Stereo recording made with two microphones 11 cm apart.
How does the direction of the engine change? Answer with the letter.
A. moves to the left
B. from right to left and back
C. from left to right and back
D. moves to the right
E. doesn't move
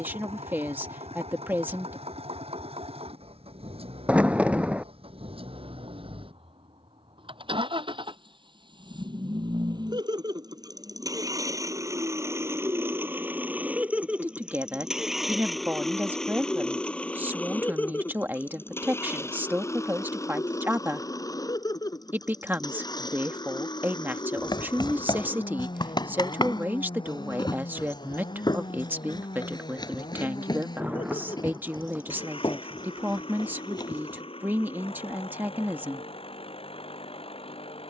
A.